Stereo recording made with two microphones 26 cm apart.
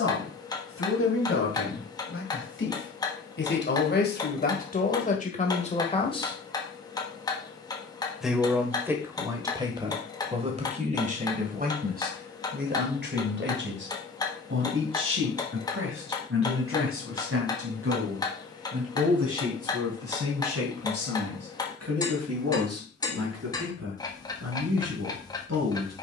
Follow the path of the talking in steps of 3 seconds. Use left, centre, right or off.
left, left, centre, right, right, right, right, right, right.